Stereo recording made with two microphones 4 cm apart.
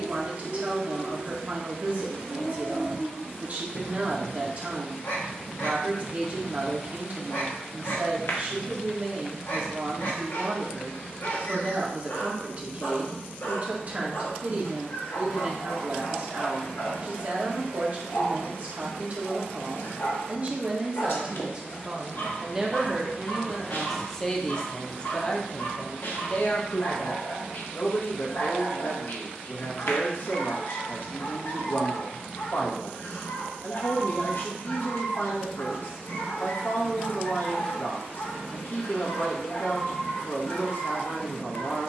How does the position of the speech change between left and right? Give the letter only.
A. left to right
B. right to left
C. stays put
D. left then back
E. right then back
B.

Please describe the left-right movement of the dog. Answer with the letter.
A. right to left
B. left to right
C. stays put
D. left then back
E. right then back
C.